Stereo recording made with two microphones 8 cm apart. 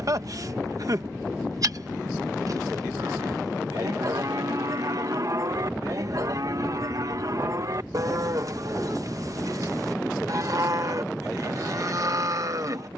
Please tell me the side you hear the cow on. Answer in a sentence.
You can hear the cow on the right.